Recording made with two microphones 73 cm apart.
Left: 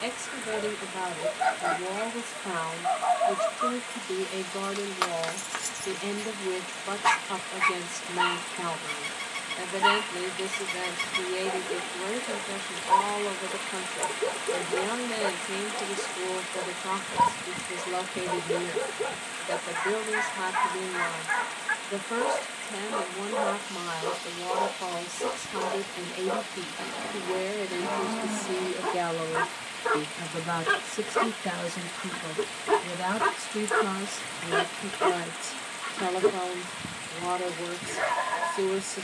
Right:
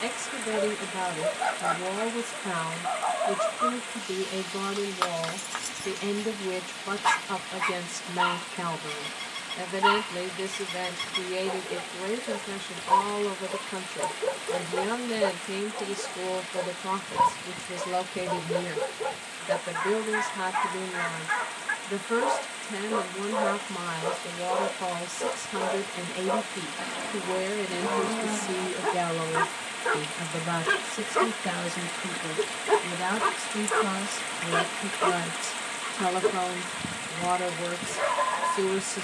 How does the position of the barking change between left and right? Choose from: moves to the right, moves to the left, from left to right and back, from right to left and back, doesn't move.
from left to right and back.